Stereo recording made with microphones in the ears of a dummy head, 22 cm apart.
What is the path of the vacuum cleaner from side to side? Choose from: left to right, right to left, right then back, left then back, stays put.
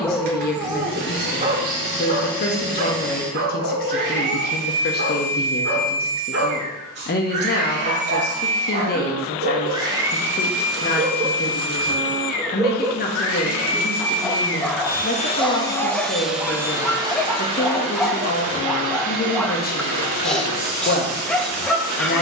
left then back.